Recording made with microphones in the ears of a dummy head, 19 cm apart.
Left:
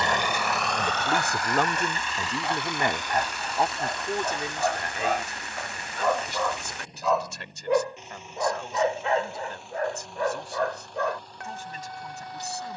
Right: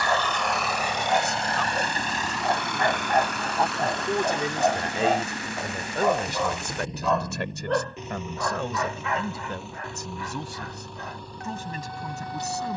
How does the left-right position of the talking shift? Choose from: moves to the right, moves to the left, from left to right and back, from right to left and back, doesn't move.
moves to the right.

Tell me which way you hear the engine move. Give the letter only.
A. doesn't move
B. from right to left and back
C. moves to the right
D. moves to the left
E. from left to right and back
C.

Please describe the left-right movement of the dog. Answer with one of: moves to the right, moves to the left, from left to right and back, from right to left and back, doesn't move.
moves to the left.